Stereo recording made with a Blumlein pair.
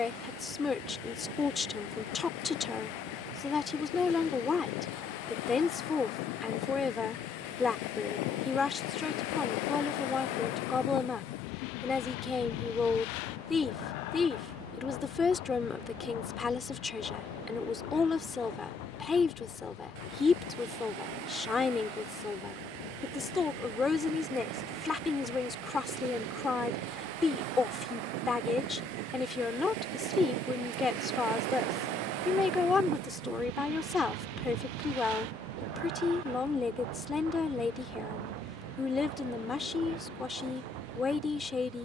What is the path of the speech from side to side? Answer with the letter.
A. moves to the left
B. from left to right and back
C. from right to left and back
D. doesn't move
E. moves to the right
D.